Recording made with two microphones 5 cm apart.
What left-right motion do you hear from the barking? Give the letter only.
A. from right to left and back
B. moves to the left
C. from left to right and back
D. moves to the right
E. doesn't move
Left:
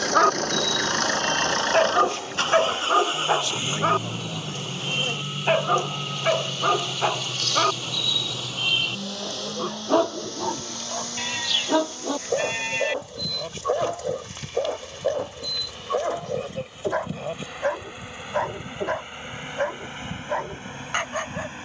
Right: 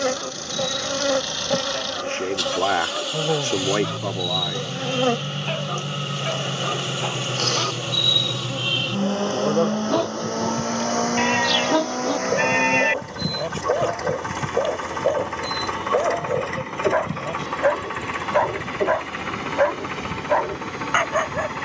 D.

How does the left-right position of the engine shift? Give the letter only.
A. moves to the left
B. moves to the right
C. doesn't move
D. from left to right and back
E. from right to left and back
B.